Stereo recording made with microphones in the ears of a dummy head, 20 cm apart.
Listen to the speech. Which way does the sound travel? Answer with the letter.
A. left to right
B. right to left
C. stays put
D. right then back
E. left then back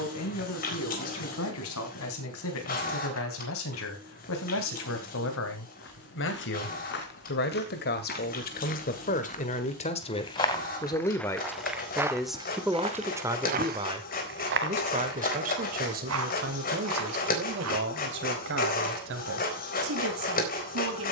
A.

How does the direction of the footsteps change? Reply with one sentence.
You can hear the footsteps move from left to right.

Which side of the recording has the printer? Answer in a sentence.
You can hear the printer on the left.